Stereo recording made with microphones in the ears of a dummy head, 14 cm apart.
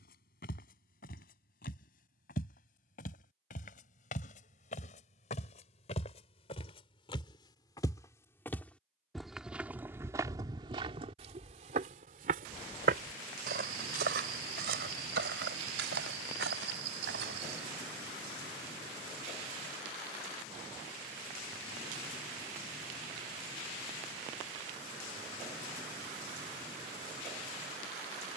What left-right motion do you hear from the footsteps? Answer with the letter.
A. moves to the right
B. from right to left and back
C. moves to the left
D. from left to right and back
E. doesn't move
A.